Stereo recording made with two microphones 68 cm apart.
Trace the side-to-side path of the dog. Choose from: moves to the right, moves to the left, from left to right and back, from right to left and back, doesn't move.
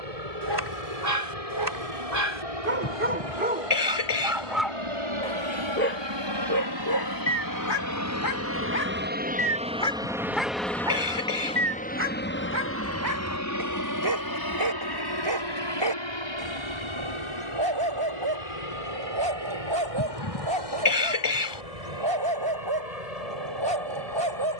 from right to left and back.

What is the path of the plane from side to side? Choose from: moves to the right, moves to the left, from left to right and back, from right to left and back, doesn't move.
moves to the left.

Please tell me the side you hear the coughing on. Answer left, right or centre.
left.